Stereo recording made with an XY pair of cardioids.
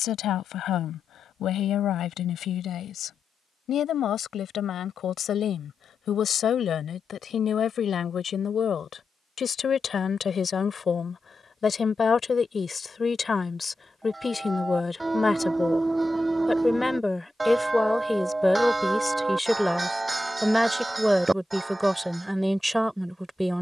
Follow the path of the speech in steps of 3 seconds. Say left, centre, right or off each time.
left, left, left, left, left, centre, centre, centre.